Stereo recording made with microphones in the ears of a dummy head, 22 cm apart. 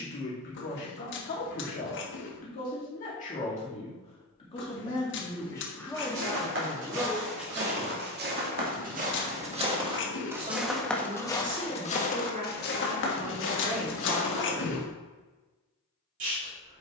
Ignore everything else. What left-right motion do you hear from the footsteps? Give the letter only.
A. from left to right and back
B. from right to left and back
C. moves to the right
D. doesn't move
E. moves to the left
E.